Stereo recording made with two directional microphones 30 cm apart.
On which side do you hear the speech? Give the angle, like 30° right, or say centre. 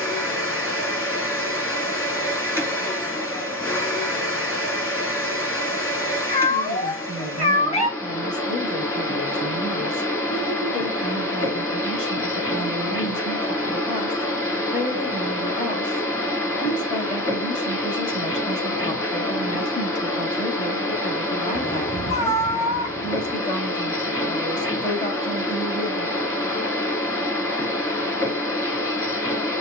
20° left.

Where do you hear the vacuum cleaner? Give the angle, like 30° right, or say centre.
10° left.